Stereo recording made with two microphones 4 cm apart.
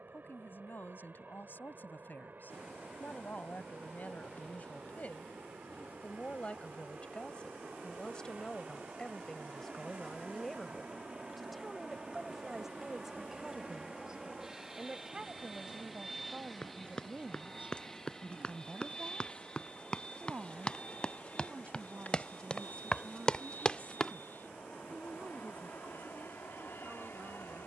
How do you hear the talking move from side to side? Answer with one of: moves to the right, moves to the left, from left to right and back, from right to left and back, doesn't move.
moves to the right.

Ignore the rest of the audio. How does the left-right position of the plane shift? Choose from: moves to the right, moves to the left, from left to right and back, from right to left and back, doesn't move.
moves to the left.